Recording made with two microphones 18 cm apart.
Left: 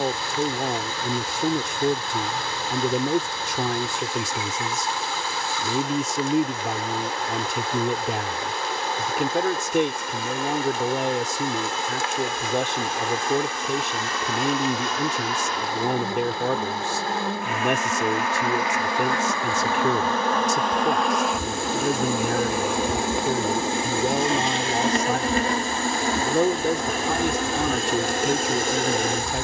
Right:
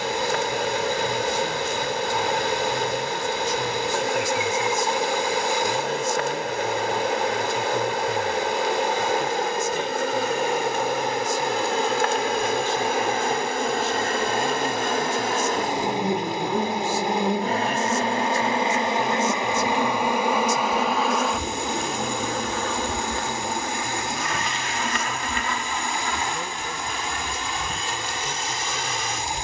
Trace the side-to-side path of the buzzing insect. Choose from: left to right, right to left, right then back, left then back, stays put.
right to left.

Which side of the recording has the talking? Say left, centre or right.
left.